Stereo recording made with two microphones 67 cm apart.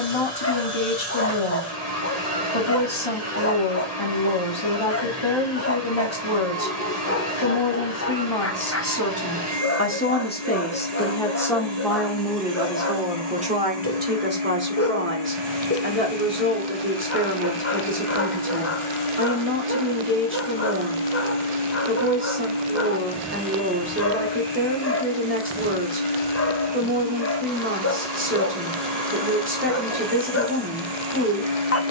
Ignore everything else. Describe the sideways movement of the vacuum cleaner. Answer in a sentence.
You can hear the vacuum cleaner stay put.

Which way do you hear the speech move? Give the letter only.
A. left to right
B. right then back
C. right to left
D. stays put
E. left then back
A.